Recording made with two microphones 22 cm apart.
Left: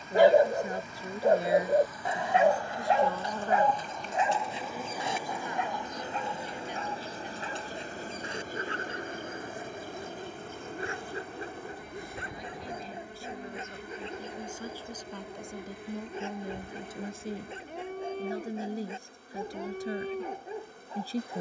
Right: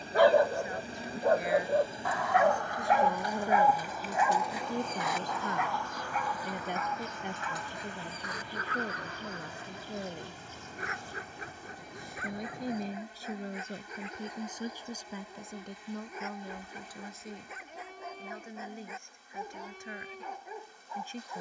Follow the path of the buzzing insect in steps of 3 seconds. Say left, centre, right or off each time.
right, centre, left, left, left, left, left.